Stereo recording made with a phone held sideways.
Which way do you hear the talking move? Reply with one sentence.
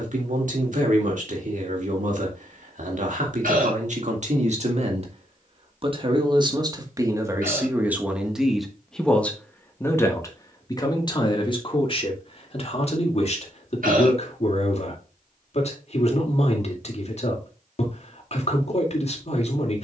You can hear the talking move from right to left.